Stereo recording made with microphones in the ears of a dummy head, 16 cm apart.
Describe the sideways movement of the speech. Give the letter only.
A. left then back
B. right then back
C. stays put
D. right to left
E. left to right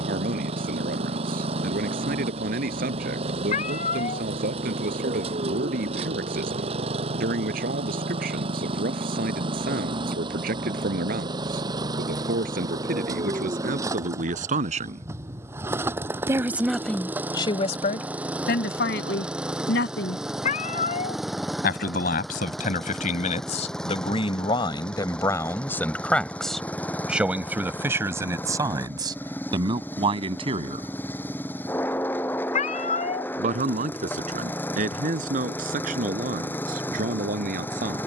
A.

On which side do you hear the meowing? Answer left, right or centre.
left.